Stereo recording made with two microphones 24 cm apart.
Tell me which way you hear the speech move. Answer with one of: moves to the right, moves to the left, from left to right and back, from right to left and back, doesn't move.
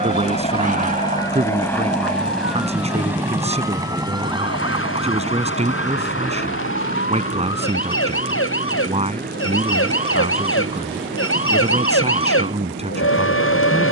doesn't move.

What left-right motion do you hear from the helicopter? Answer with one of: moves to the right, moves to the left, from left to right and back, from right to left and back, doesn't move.
moves to the right.